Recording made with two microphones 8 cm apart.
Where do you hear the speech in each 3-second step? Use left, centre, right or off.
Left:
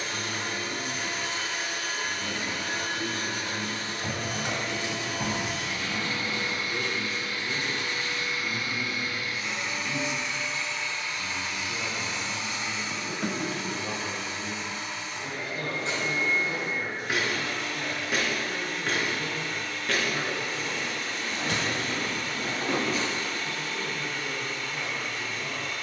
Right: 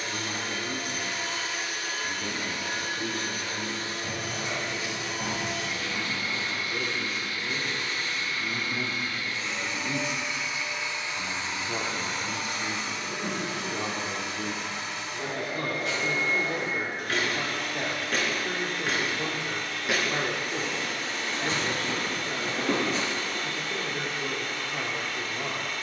right, centre, centre, right, right, right, right, right, right.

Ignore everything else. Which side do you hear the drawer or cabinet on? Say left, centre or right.
left.